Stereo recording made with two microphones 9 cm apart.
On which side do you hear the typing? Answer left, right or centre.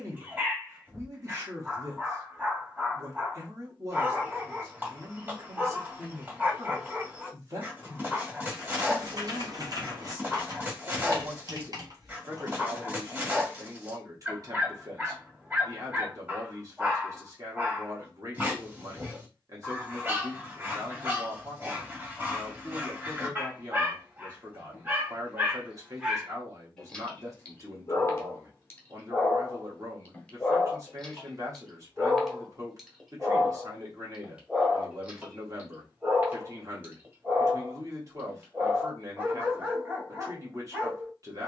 right.